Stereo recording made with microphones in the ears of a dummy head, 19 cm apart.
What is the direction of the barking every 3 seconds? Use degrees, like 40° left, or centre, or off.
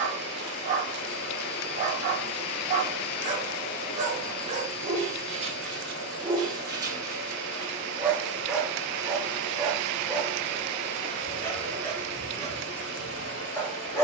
30° right, 30° right, 10° right, 10° left, 10° left.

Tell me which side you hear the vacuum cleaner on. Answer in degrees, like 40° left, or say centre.
80° left.